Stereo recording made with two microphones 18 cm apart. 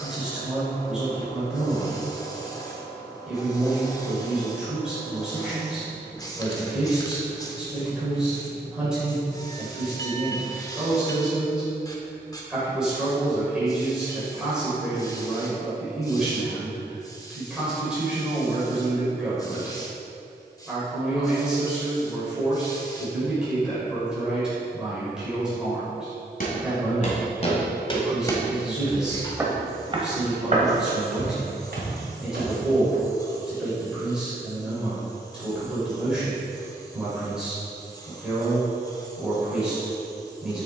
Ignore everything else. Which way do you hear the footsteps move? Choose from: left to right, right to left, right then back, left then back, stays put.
left to right.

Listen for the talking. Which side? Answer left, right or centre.
centre.